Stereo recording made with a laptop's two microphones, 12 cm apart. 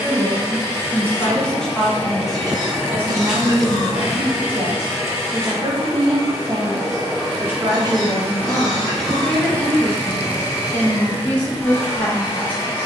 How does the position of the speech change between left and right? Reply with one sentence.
In this clip you hear the speech move from left to right and back again.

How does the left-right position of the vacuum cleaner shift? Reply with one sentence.
In this clip you hear the vacuum cleaner move from left to right and back again.